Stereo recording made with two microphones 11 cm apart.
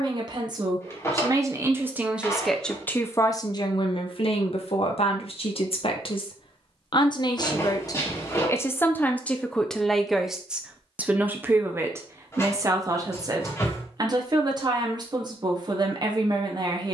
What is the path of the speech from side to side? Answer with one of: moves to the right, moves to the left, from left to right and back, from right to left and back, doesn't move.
from right to left and back.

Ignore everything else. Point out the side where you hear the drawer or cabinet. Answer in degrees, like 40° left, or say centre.
30° left.